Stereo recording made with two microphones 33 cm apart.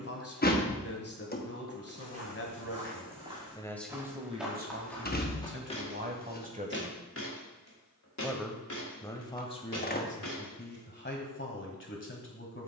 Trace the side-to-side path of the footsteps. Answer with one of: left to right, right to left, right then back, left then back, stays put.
right to left.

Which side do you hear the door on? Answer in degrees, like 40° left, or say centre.
30° left.